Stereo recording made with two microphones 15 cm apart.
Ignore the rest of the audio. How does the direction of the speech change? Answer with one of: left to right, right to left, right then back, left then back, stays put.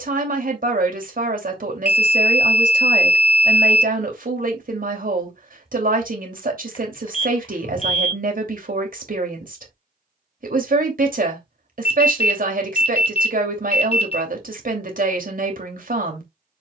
stays put.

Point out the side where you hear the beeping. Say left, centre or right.
left.